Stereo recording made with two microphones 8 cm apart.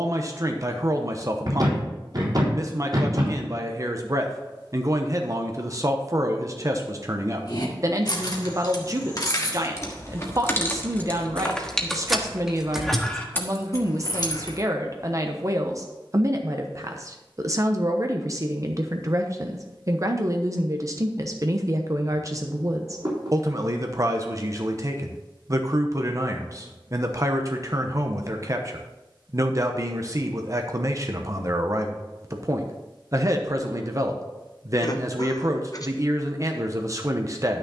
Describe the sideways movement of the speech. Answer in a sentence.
You can hear the speech stay in one place.